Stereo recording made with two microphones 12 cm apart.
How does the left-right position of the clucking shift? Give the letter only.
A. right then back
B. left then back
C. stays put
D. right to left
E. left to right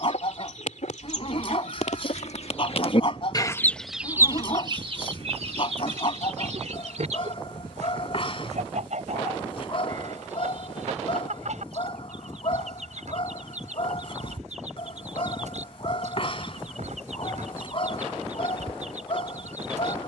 E.